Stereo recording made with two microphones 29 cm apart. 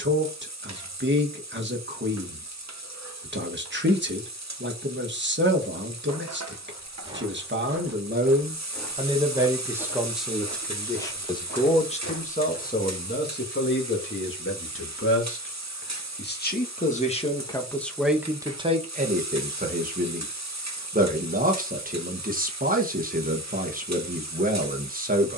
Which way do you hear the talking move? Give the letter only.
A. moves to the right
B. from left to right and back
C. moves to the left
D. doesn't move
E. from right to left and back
E.